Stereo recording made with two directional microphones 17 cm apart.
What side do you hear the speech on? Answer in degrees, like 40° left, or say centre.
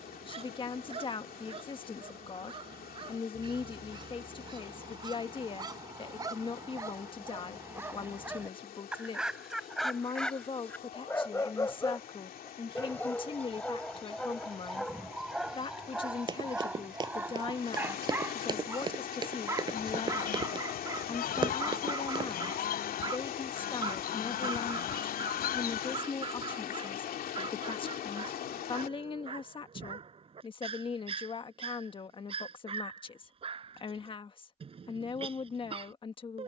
30° left.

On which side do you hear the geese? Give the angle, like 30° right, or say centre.
60° left.